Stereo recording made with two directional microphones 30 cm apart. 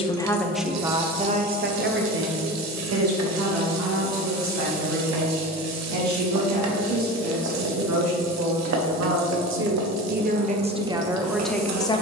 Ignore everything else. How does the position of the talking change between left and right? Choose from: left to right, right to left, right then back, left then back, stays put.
right then back.